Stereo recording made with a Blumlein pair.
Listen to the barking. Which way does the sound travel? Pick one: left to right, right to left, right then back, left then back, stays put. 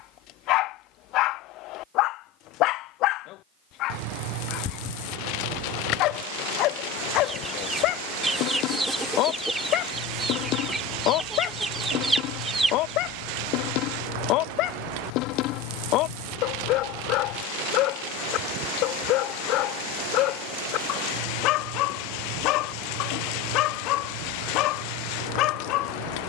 stays put.